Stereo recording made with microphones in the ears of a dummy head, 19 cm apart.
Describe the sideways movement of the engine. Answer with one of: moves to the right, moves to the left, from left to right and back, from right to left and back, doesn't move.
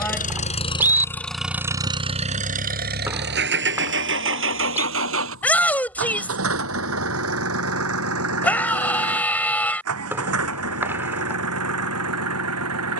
moves to the right.